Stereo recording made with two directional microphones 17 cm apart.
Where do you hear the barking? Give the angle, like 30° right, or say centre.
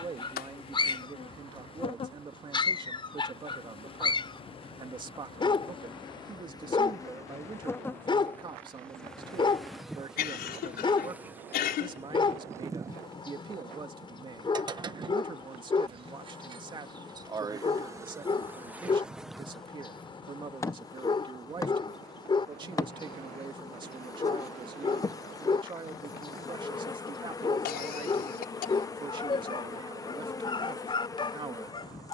30° left.